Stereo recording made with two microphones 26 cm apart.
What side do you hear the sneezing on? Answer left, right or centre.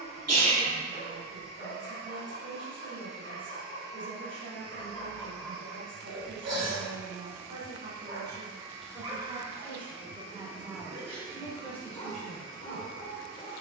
right.